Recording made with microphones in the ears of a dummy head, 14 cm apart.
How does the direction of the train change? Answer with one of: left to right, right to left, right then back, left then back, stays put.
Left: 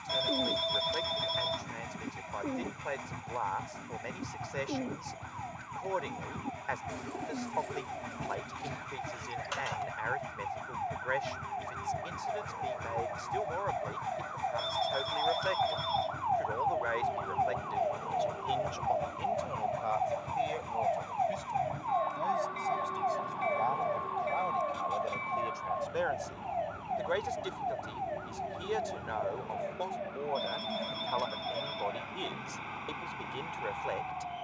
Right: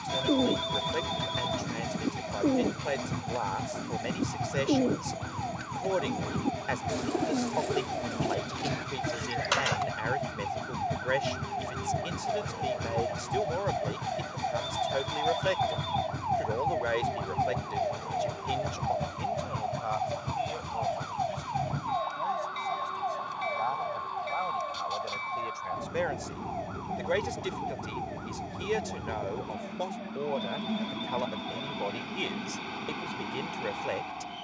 stays put.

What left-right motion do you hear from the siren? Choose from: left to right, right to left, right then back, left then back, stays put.
right to left.